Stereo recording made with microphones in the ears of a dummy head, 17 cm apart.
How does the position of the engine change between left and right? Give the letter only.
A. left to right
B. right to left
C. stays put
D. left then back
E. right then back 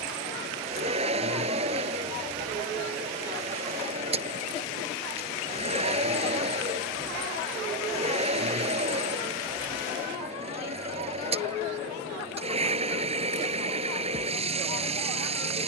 C.